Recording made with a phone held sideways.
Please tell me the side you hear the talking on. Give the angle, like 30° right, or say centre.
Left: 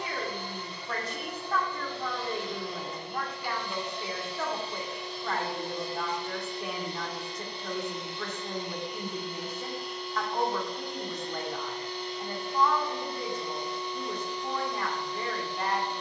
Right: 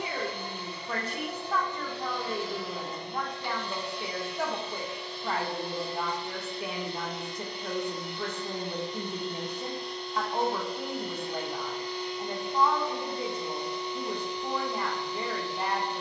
10° right.